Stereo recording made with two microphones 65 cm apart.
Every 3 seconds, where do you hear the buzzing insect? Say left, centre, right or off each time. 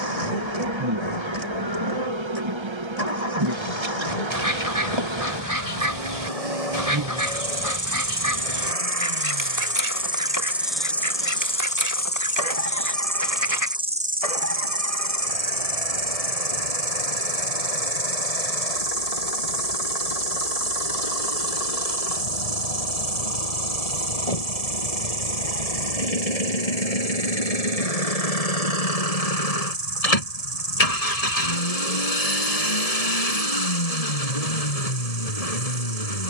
right, right, right, centre, centre, right, right, right, right, right, right, right.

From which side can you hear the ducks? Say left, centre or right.
right.